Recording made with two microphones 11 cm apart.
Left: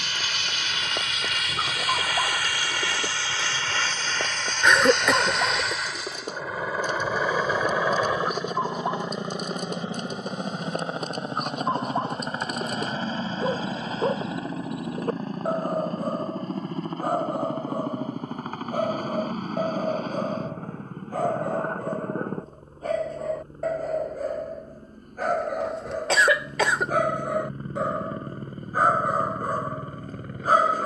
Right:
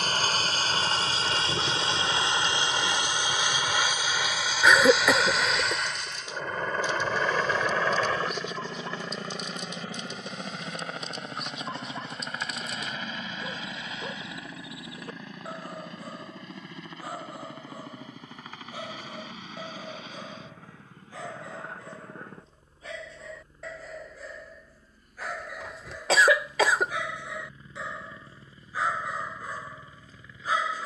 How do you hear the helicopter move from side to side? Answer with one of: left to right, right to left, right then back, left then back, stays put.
right to left.